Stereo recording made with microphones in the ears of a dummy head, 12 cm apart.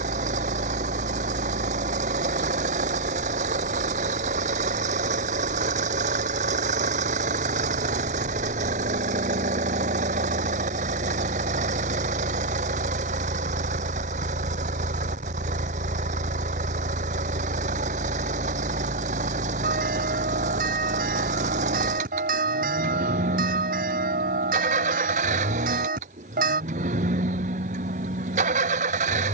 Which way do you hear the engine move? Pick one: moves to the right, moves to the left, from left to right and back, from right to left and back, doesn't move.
doesn't move.